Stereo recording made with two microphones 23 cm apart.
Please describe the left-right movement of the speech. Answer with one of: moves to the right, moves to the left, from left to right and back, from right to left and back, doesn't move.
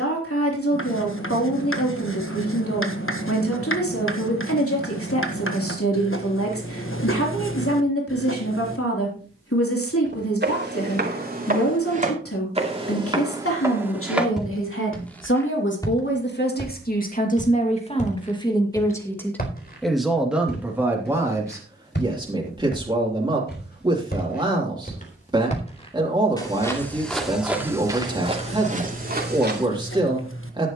moves to the right.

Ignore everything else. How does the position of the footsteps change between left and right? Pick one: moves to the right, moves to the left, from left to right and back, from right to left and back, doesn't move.
from right to left and back.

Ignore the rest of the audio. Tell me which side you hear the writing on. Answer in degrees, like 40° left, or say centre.
60° left.